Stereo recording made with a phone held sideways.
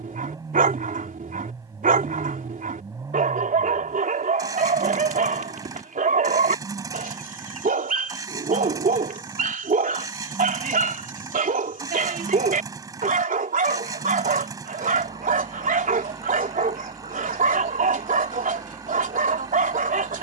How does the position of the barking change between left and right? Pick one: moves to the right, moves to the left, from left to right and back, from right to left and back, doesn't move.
doesn't move.